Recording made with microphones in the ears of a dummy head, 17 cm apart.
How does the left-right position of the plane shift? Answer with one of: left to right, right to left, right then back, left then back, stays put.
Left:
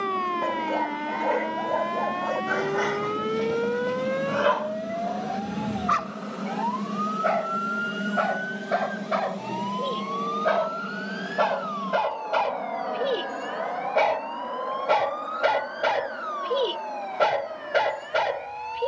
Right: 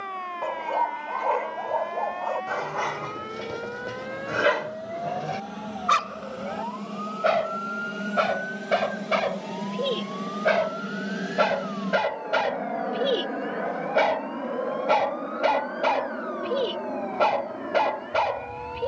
left to right.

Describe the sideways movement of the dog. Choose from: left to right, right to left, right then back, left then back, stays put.
right then back.